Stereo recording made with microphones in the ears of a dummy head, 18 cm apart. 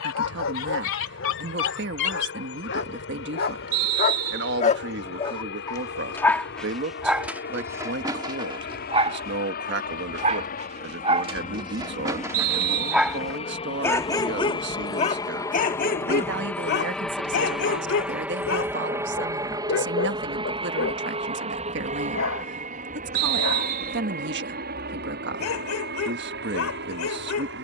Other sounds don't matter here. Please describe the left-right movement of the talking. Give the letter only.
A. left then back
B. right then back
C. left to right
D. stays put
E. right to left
D.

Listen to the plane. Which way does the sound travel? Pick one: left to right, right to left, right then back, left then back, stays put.
left to right.